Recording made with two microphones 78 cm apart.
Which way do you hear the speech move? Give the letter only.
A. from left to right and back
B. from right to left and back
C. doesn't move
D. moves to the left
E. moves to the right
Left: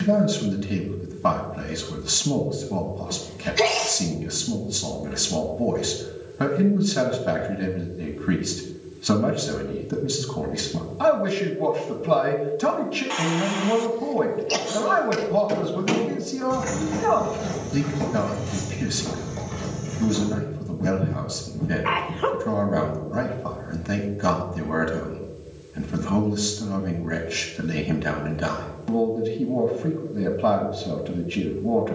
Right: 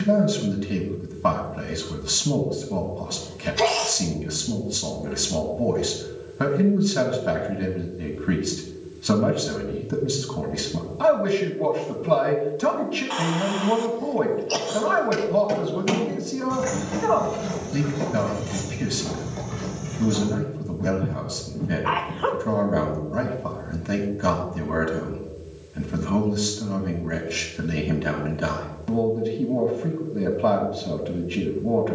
C.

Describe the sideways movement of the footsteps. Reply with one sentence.
In this clip you hear the footsteps go from the right side to the left.